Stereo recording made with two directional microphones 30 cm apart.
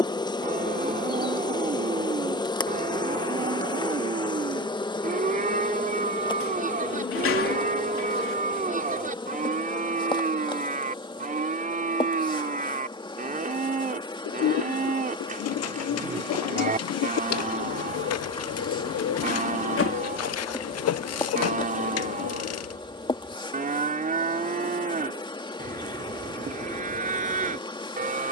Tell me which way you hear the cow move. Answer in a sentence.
In this clip you hear the cow stay put.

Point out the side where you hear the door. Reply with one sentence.
In this clip you hear the door on the left.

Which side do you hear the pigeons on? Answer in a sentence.
You can hear the pigeons on the left.